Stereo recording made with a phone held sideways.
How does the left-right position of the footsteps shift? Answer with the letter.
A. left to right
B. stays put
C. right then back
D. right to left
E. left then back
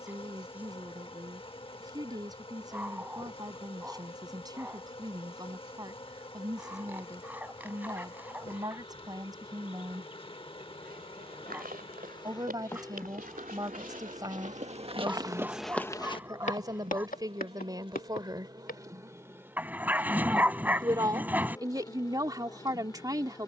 D.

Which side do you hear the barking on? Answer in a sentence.
You can hear the barking in the centre.